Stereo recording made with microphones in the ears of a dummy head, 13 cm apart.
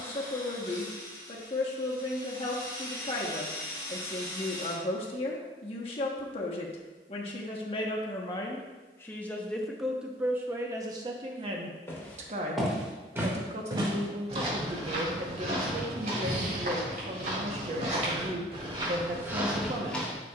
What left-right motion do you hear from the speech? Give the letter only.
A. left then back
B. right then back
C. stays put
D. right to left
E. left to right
E.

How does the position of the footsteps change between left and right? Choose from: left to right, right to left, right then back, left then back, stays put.
right then back.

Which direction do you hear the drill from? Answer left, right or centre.
left.